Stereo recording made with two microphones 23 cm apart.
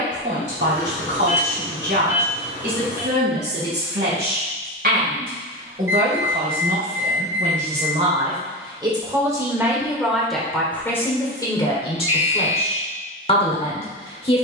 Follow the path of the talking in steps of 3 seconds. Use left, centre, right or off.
right, right, right, centre, left.